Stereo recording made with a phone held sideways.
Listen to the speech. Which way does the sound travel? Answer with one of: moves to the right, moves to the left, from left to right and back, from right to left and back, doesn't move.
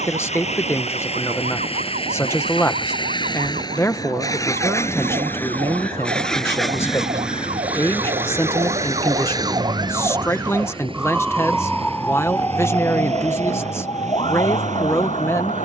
doesn't move.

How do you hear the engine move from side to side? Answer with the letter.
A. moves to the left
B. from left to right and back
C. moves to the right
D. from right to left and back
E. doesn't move
C.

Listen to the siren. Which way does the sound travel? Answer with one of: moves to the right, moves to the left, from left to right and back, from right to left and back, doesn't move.
moves to the left.